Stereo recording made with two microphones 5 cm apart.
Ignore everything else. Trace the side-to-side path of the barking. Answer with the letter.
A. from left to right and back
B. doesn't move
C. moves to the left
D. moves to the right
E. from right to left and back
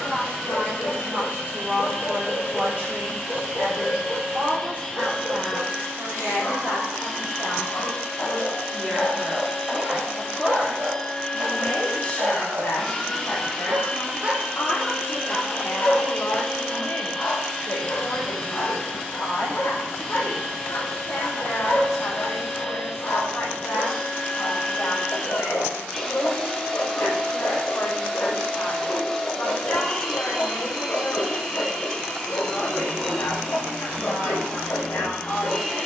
A.